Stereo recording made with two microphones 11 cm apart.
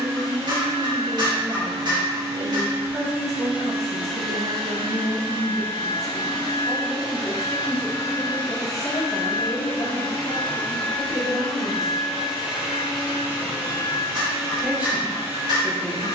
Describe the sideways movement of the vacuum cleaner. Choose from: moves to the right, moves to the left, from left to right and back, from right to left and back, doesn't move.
from right to left and back.